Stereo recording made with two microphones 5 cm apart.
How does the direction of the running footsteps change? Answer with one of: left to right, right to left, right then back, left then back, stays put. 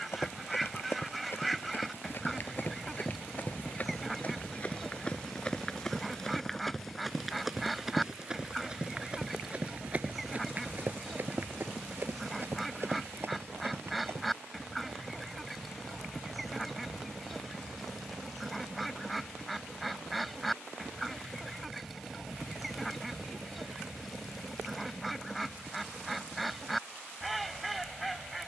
left to right.